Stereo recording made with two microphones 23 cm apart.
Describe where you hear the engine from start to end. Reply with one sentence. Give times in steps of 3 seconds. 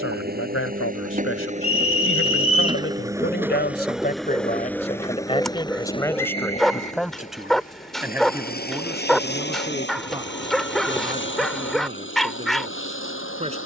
In this clip you hear the engine on the right from 0 s, in the centre from 3 s and on the left from 6 s.